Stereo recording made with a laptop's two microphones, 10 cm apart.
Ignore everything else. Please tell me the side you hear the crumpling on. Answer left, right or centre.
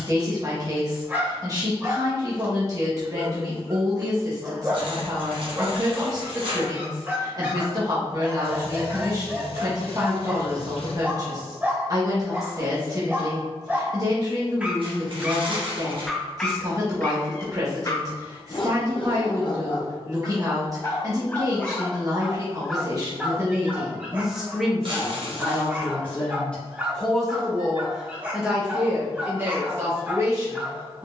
right.